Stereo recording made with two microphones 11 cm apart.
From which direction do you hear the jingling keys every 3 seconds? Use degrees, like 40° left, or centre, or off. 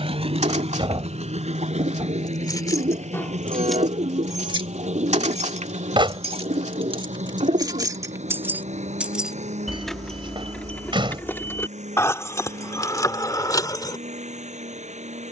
30° left, 30° right, 40° right, 10° left, 30° left.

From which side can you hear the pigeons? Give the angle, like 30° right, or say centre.
80° right.